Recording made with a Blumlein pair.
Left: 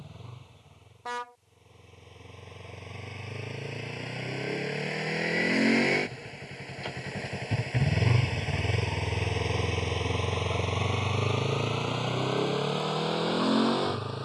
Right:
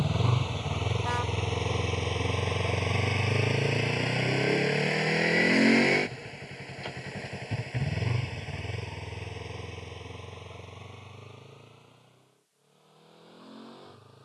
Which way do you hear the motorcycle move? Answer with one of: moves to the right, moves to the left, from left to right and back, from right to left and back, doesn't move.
moves to the left.